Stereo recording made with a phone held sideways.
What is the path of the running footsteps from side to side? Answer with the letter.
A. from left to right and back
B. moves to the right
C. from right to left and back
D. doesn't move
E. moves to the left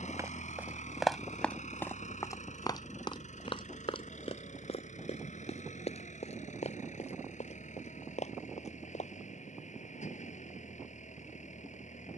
E.